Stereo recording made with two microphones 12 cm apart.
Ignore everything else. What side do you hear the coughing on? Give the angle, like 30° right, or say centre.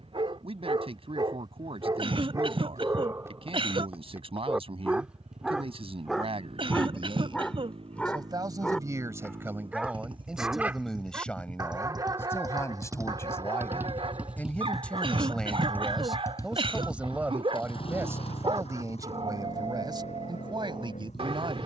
50° right.